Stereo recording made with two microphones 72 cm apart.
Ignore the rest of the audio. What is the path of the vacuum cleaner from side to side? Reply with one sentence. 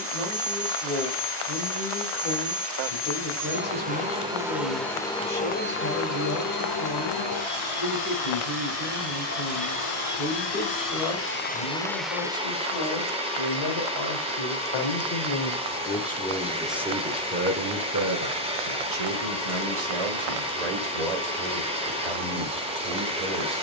In this clip you hear the vacuum cleaner go left and come back.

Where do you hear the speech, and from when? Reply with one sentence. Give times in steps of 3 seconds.
You can hear the speech on the left from 0 s, in the centre from 15 s and on the right from 18 s.